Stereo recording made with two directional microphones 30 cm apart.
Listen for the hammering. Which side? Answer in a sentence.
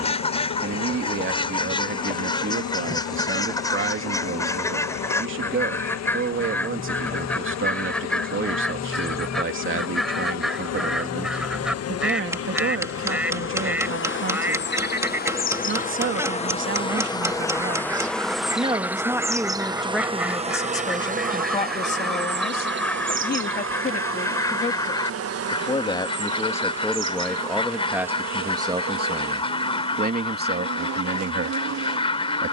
You can hear the hammering in the centre.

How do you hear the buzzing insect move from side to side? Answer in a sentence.
You can hear the buzzing insect move to the right.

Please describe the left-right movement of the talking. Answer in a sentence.
You can hear the talking go left and come back.